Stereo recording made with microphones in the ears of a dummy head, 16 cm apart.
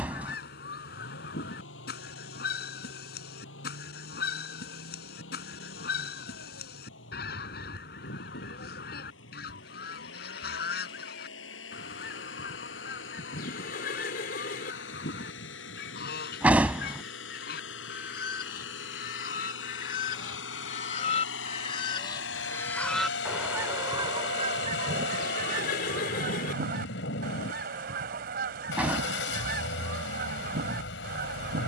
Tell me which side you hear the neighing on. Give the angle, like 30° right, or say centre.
60° left.